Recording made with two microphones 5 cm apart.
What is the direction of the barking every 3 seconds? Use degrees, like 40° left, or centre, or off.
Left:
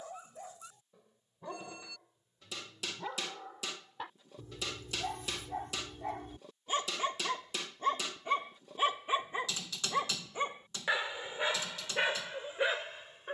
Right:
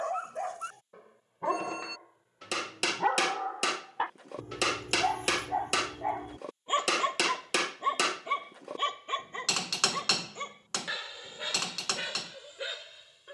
70° right, 50° right, 10° right, 20° left, 40° left.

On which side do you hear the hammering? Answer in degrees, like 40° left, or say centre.
80° right.